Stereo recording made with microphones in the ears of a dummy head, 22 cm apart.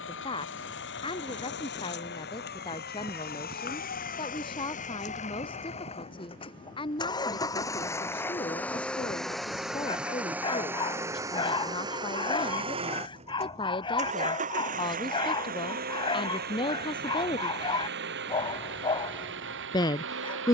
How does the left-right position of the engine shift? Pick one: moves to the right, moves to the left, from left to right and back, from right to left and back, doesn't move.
moves to the right.